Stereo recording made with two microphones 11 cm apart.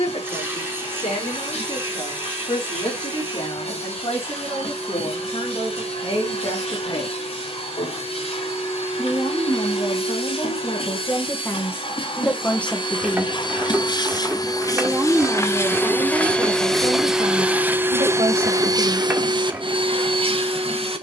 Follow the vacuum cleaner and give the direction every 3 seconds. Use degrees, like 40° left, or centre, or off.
70° left, 60° left, 60° left, 50° left, 40° left, 10° left, 40° right.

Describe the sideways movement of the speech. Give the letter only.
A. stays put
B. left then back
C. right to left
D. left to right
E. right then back
D.